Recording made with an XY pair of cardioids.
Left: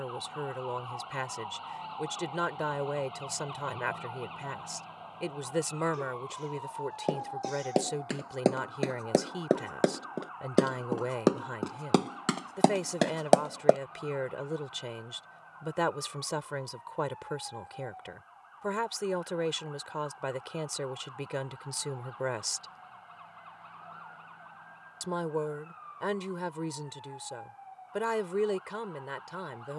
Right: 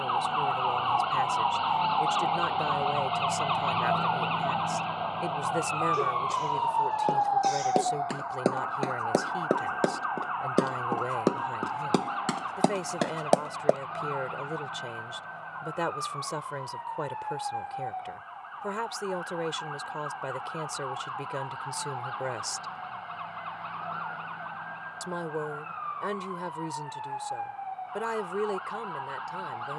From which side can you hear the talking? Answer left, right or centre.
centre.